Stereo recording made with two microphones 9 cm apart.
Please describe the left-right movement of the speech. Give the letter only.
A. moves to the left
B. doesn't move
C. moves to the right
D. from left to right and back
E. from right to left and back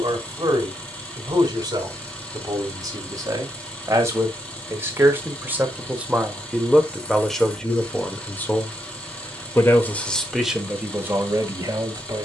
E.